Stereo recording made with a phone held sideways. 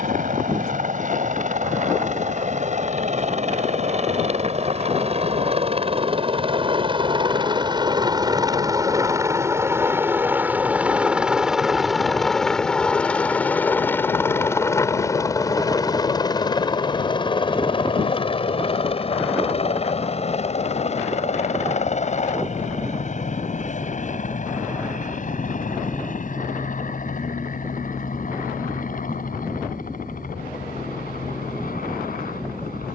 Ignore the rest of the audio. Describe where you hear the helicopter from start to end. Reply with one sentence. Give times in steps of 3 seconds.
In this clip you hear the helicopter on the right from 0 s, in the centre from 9 s and on the left from 15 s.